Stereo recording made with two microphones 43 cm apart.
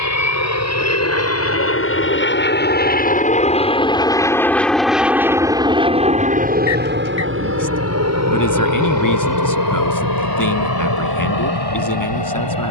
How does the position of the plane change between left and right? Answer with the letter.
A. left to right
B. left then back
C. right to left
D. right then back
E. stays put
A.